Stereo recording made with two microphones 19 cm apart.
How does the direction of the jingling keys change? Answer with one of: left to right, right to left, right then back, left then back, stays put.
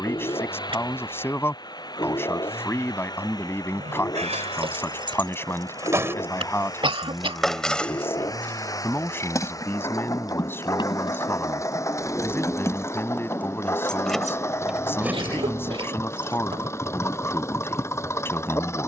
left then back.